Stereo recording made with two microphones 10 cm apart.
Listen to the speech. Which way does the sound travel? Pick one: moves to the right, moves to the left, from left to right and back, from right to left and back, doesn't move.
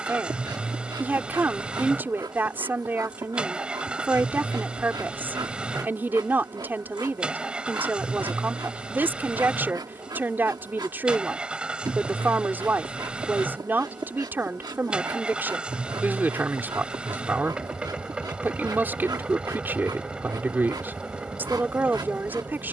doesn't move.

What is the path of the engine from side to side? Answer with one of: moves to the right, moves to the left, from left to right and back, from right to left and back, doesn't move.
doesn't move.